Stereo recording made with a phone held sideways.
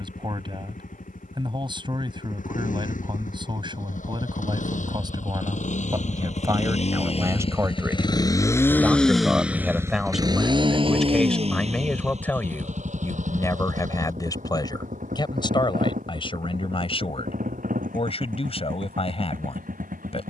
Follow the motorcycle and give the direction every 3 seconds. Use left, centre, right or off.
left, left, left, right, right, right, right.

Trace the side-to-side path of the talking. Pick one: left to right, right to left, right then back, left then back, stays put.
right to left.